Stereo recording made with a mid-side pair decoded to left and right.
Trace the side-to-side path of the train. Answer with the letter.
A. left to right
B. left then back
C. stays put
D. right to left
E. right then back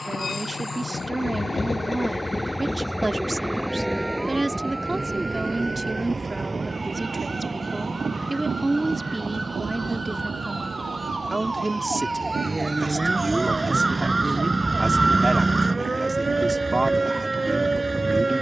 A.